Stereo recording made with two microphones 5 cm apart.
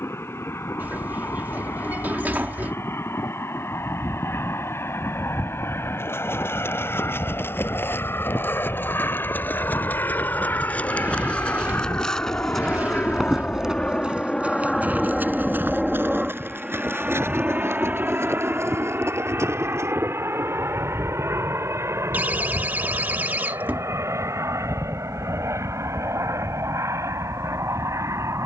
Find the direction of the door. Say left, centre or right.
right.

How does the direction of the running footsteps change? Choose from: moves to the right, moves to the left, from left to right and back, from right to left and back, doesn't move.
moves to the right.